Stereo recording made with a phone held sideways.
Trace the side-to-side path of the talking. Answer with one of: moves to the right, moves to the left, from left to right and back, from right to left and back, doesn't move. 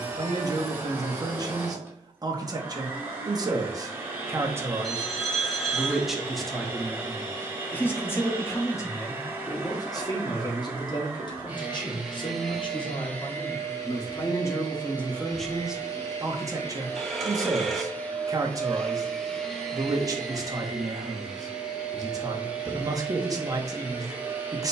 from right to left and back.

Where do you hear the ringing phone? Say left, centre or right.
centre.